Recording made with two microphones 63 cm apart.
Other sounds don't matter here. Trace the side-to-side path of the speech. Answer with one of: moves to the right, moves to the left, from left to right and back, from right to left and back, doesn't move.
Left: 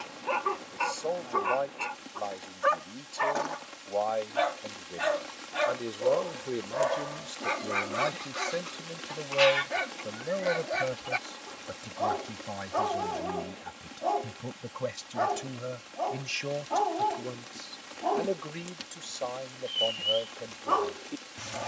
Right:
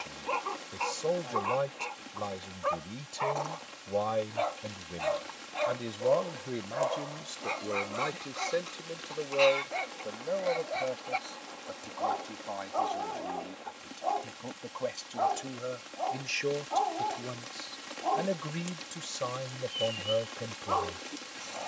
from right to left and back.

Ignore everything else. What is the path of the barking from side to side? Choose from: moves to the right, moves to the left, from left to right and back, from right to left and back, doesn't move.
doesn't move.